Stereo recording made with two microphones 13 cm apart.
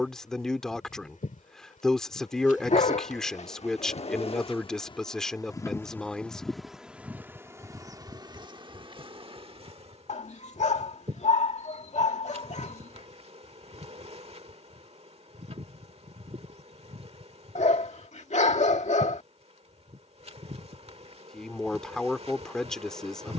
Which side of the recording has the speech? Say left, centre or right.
centre.